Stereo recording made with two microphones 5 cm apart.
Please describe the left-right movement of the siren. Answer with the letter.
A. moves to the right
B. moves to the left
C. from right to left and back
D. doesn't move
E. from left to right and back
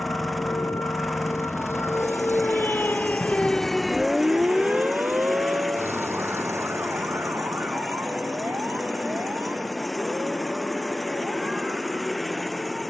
A.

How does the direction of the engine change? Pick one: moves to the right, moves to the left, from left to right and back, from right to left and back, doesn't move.
doesn't move.